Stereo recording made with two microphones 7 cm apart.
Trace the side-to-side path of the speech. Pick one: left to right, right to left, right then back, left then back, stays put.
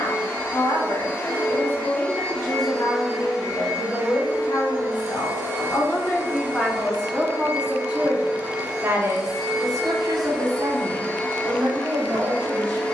left to right.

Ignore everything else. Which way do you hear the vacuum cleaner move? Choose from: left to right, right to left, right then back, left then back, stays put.
right then back.